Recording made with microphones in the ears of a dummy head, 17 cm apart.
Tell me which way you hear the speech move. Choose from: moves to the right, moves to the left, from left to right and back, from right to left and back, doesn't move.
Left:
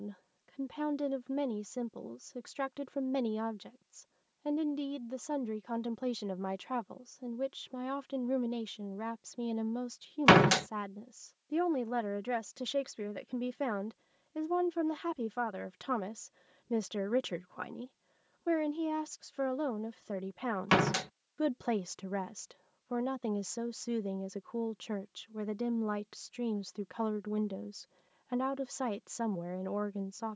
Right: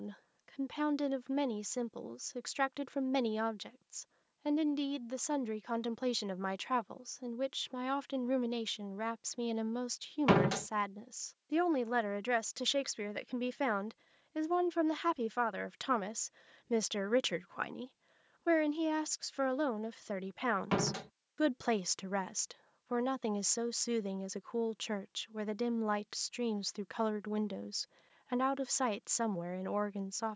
doesn't move.